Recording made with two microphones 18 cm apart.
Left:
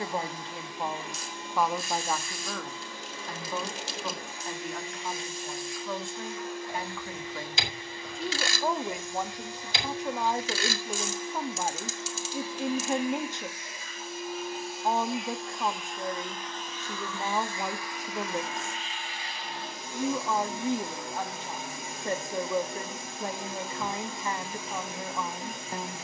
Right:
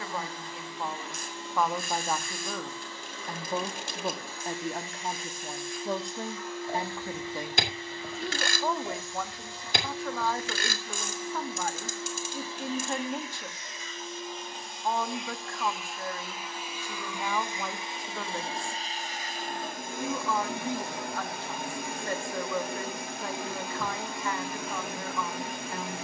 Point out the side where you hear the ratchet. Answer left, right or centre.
right.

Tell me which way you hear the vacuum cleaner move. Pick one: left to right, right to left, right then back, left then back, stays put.
left to right.